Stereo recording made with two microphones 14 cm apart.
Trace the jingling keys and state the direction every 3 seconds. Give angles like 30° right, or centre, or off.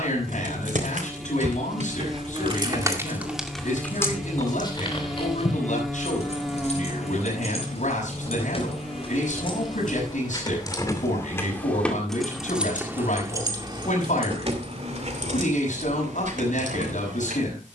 60° right, 20° left, 50° left, 30° left, 30° right, 60° right.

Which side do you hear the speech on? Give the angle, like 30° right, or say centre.
60° left.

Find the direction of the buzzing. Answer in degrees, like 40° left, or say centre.
centre.